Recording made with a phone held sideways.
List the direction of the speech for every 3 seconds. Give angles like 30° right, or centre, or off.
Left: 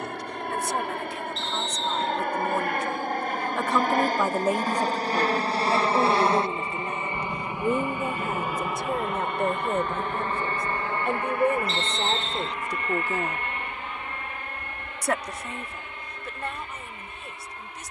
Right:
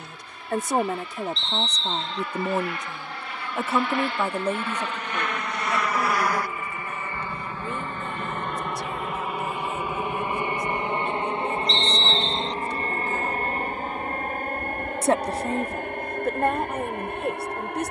40° right, 10° left, 40° left, 60° left, 40° left, 50° right.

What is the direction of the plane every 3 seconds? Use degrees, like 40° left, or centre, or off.
60° left, 40° left, 20° left, 10° right, 40° right, 50° right.